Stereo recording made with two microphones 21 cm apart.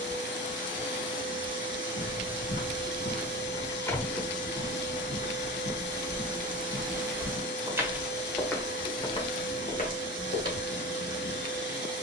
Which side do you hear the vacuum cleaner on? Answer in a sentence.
You can hear the vacuum cleaner on the left.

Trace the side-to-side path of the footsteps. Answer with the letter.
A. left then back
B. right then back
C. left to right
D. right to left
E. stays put
B.